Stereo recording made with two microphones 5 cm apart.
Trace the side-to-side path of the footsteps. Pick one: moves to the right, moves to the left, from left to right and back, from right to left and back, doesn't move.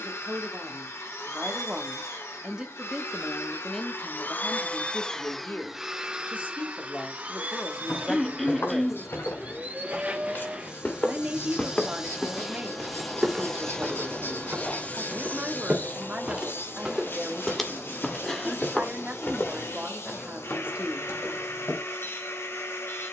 from left to right and back.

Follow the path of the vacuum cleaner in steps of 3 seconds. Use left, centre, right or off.
left, left, right, right, centre, left, left, left.